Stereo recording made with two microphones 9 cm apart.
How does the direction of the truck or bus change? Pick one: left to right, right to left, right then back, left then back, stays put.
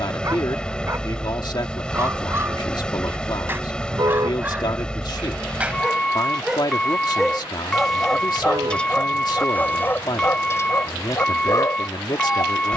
stays put.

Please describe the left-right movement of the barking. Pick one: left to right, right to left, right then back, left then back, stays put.
right to left.